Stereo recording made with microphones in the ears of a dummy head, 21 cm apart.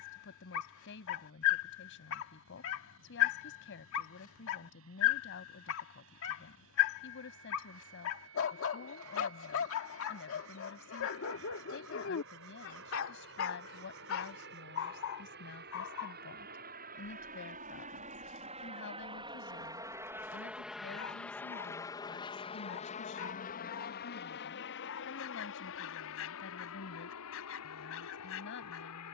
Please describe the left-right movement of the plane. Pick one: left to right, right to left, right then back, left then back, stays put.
right to left.